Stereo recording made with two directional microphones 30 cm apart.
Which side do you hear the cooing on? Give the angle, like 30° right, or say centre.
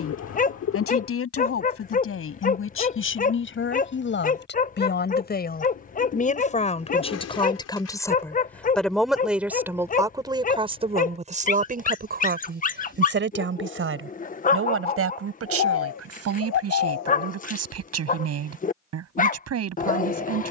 60° left.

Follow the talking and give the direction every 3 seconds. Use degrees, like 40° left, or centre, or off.
50° left, 40° left, 20° left, 20° right, 40° right, 60° right, 60° right.